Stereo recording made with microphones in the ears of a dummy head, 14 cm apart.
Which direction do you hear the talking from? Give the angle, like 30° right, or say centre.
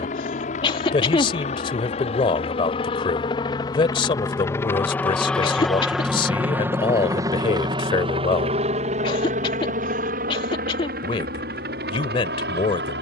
30° left.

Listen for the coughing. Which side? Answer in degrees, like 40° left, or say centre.
30° left.